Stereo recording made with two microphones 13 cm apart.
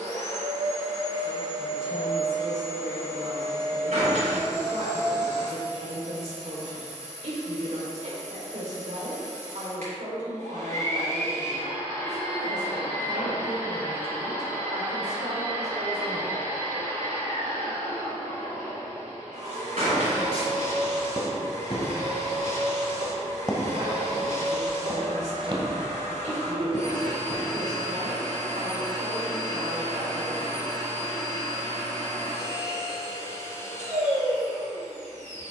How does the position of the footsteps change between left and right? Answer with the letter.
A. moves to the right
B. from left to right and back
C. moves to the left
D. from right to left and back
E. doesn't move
B.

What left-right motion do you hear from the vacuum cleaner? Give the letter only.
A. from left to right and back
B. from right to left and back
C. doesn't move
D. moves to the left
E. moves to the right
C.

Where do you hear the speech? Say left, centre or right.
right.